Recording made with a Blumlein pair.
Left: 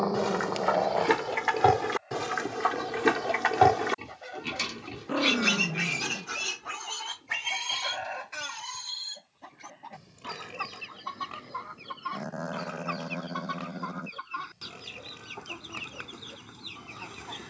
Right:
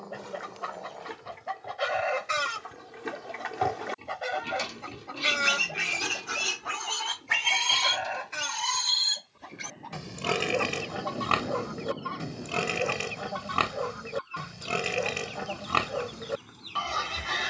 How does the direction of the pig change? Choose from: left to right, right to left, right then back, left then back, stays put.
left to right.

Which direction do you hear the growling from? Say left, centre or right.
left.